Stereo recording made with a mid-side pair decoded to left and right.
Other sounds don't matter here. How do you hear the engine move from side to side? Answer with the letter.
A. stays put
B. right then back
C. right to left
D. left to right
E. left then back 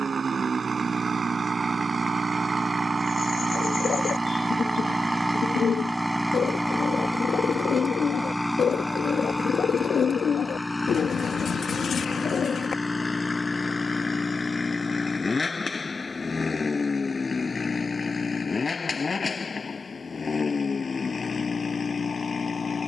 C.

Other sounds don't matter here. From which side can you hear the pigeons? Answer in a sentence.
You can hear the pigeons on the left.